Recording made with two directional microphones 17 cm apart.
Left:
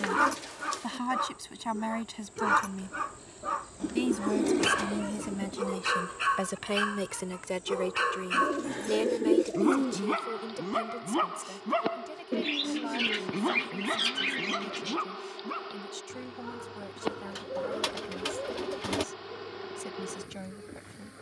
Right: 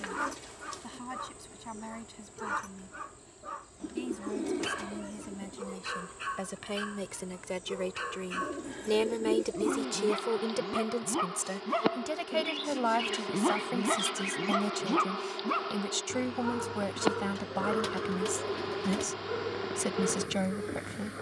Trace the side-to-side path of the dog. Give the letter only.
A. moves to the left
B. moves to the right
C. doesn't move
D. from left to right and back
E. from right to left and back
B.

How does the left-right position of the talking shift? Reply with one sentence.
In this clip you hear the talking travel towards the right.